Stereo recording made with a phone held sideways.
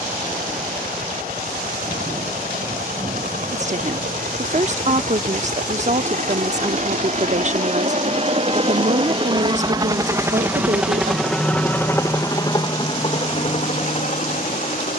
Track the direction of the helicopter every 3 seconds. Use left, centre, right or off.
right, right, right, centre, left.